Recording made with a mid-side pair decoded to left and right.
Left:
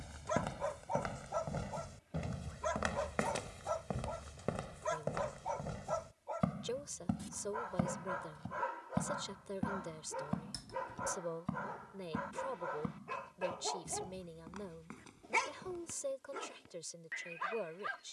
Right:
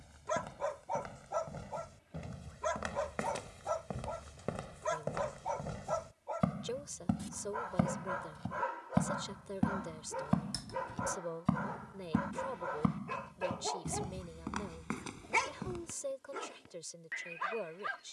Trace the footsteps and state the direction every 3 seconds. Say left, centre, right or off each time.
left, centre, right, right, right, right.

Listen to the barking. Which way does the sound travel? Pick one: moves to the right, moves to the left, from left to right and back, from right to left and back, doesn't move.
doesn't move.